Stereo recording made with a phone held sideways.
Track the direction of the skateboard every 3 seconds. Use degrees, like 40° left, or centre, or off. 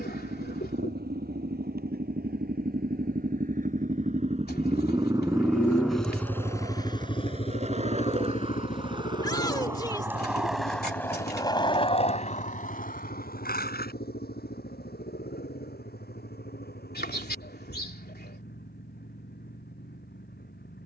off, 50° right, 40° right, centre, 60° left, off, off.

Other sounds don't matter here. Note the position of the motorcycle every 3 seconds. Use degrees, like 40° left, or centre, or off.
70° right, 40° right, 30° left, 60° left, 70° left, 70° left, 70° left.